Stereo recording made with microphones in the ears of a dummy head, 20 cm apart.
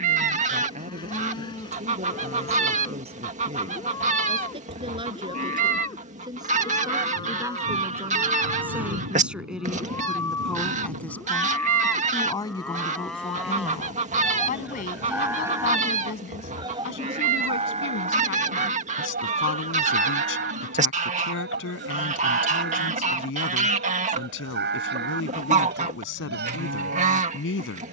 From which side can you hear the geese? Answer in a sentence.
In this clip you hear the geese on the right.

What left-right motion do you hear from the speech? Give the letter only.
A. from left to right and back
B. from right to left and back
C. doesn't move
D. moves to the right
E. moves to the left
E.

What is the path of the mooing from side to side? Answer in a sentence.
In this clip you hear the mooing move to the right.